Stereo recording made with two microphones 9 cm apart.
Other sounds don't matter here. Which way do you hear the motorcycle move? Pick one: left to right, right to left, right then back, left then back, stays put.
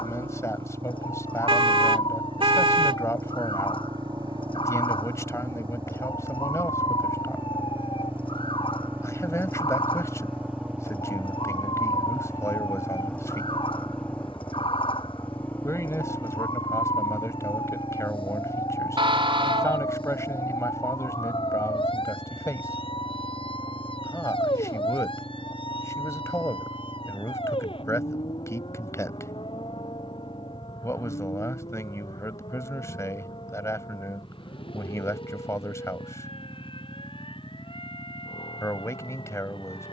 right to left.